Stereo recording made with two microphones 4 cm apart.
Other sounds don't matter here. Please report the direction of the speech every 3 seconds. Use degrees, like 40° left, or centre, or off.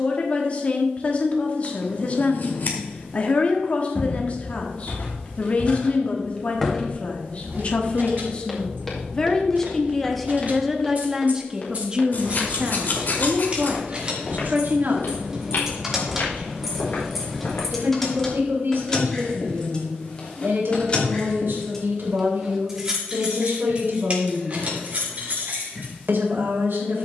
40° left, 40° left, 40° left, centre, 40° right, 60° right, 70° right, 80° right, 80° right.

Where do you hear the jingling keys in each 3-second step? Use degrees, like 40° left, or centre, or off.
off, off, 60° right, 50° right, 30° right, 10° right, 20° left, 10° right, 50° right.